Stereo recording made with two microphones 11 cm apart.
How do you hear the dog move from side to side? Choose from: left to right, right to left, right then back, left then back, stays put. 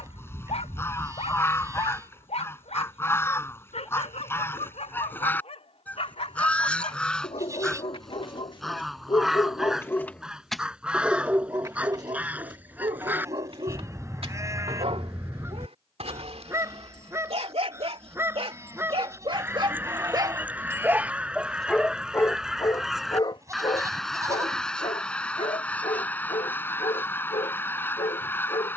right then back.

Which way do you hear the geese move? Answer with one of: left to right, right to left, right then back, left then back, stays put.
right then back.